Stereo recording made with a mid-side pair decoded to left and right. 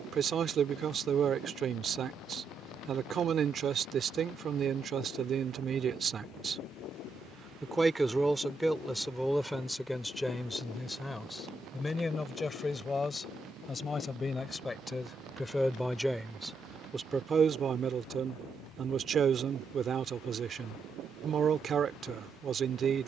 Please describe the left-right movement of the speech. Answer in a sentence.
You can hear the speech move from right to left and back again.